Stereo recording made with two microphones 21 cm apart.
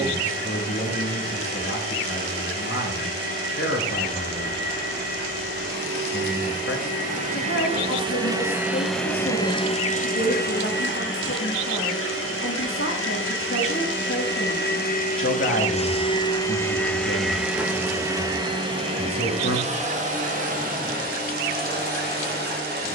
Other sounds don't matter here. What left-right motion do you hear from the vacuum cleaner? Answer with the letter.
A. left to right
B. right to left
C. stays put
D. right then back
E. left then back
E.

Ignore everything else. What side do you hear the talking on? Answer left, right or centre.
left.